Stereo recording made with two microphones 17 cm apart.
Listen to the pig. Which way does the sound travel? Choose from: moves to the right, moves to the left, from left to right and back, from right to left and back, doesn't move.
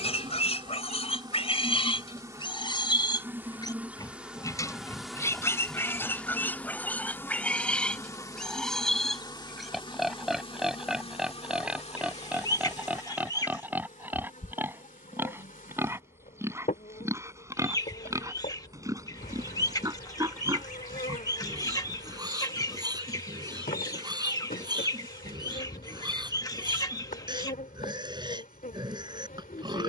moves to the right.